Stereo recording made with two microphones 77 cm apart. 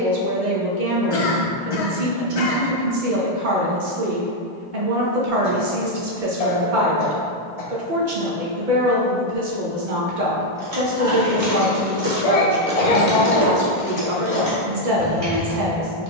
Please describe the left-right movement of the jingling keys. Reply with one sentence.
In this clip you hear the jingling keys go from the right side to the left.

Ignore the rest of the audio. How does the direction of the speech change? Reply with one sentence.
In this clip you hear the speech stay in one place.